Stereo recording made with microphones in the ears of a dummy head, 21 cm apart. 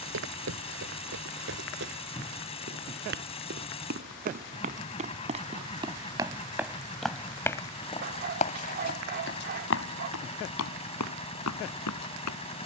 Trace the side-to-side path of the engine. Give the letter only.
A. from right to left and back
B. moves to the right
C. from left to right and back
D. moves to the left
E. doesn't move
E.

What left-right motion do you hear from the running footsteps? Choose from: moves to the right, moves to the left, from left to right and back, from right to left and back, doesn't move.
moves to the left.